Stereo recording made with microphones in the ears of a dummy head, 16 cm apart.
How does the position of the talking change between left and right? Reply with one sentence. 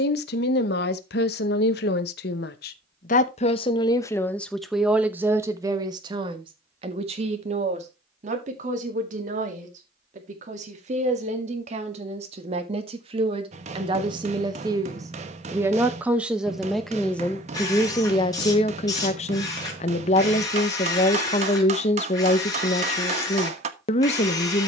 You can hear the talking move from left to right and back again.